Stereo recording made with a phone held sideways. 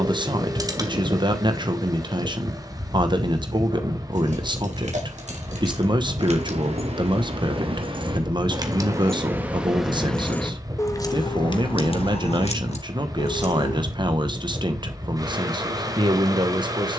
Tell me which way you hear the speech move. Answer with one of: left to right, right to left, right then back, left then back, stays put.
stays put.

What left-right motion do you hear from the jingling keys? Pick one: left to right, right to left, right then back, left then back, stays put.
right to left.